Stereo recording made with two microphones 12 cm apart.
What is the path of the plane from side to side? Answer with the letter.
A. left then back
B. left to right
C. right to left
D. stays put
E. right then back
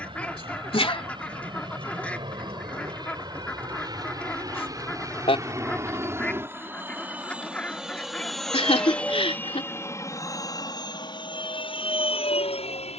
C.